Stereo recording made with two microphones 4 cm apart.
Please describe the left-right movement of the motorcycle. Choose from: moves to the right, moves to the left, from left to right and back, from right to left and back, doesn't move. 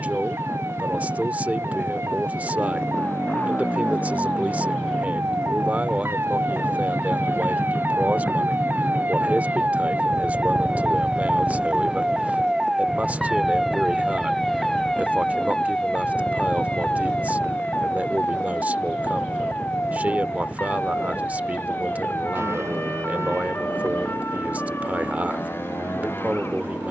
moves to the right.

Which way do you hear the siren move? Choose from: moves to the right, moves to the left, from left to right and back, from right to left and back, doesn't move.
moves to the left.